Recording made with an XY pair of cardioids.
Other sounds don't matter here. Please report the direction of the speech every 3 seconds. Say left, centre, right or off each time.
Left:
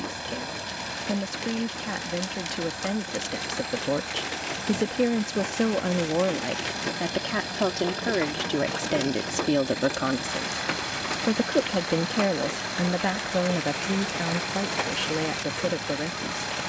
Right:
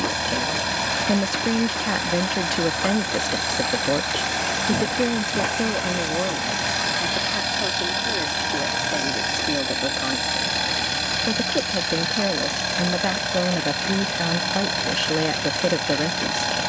right, centre, left, left, centre, right.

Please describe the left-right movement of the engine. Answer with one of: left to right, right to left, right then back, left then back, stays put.
stays put.